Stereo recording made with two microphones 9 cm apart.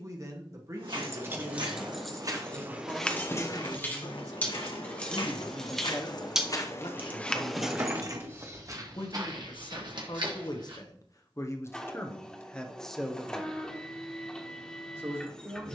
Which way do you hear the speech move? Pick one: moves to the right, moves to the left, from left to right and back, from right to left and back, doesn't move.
from right to left and back.